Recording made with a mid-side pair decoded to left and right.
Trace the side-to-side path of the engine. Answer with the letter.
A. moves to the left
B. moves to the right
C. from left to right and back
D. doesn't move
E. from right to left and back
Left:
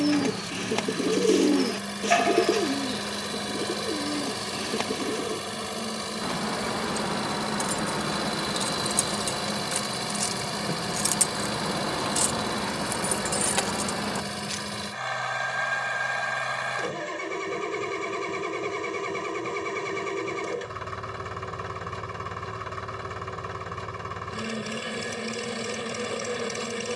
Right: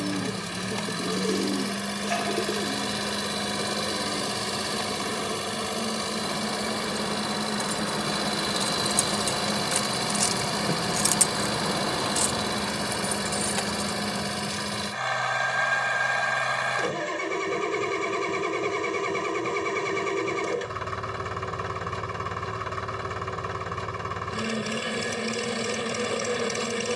D.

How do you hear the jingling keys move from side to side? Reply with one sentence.
In this clip you hear the jingling keys move from left to right and back again.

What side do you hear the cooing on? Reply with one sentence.
In this clip you hear the cooing on the left.